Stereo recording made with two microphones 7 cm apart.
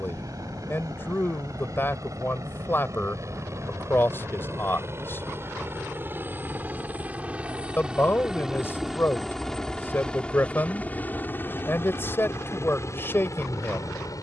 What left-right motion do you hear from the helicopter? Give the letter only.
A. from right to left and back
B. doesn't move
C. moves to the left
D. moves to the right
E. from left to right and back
C.